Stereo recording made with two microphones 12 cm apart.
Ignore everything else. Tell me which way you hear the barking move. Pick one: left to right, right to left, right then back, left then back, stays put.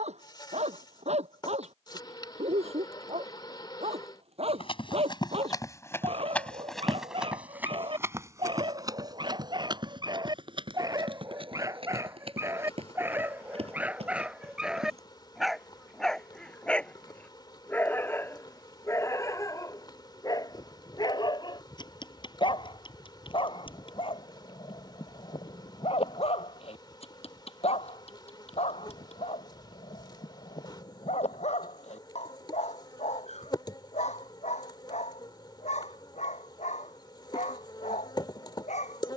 right to left.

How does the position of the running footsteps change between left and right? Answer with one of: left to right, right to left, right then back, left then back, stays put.
left to right.